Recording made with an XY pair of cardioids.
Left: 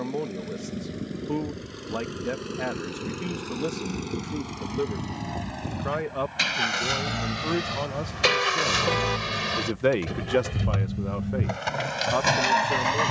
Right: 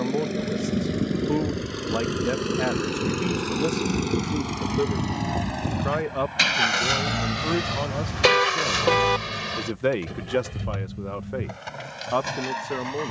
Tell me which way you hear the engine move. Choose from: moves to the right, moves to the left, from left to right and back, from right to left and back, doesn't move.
moves to the left.